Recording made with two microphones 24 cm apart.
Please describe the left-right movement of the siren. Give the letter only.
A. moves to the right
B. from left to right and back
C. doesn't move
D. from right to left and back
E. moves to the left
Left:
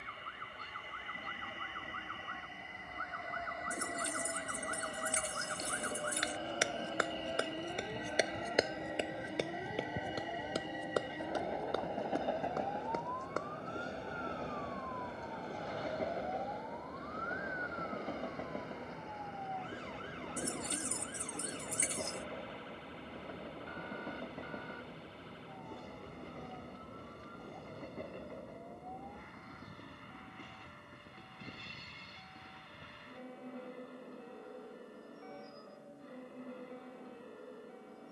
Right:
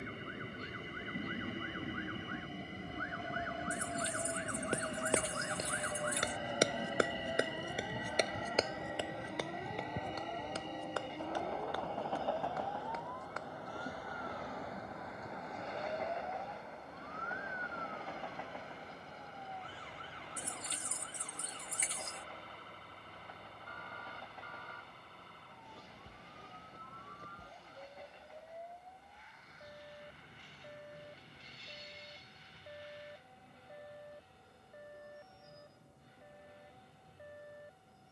A.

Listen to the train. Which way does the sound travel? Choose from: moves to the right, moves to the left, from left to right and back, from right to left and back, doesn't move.
moves to the left.